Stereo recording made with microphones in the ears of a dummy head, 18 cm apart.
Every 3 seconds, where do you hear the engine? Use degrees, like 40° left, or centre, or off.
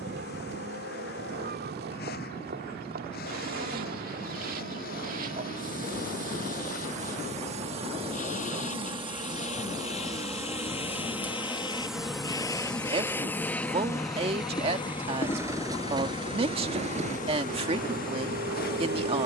50° left, 50° left, 40° left, 30° left, 10° left, 30° right, 50° right.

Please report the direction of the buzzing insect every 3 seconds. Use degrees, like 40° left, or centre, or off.
50° right, 50° right, 30° right, 10° right, 10° left, 40° left, 50° left.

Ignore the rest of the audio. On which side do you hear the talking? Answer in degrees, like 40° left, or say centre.
30° right.